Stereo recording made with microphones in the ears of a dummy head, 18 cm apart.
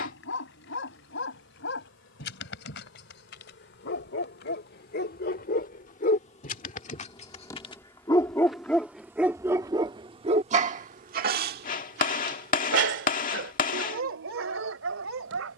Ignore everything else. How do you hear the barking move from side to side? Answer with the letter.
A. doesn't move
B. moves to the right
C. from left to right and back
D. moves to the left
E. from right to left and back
B.